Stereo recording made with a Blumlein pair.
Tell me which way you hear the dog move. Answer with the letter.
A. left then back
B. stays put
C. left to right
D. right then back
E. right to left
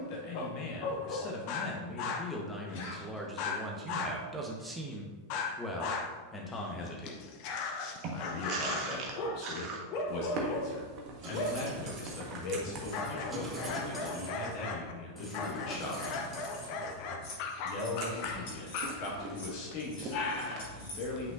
B.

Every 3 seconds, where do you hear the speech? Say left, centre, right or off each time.
left, centre, left, left, left, left, left.